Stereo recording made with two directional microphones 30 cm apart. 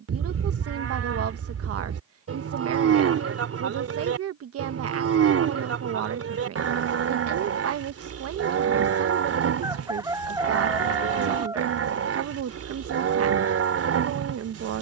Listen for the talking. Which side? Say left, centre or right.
right.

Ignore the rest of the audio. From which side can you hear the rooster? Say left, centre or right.
centre.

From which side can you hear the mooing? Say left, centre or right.
right.